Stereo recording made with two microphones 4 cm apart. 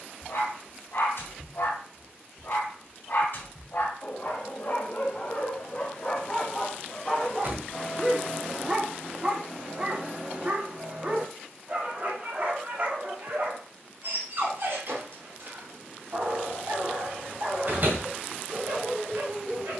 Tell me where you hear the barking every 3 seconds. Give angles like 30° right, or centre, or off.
60° left, 40° left, centre, 30° right, 50° right, 60° right, 60° right.